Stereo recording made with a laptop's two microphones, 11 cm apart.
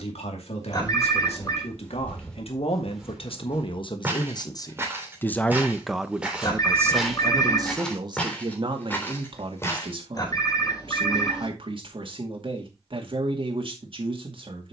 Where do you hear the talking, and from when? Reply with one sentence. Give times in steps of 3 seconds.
You can hear the talking on the left from 0 s and on the right from 6 s.